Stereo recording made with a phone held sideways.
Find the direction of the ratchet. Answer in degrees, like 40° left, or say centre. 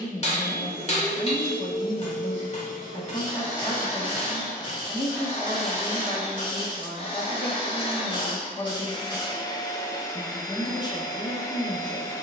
30° left.